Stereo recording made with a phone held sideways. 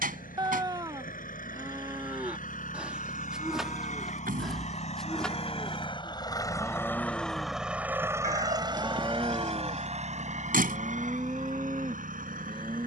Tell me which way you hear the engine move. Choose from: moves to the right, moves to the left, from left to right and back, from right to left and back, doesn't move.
moves to the right.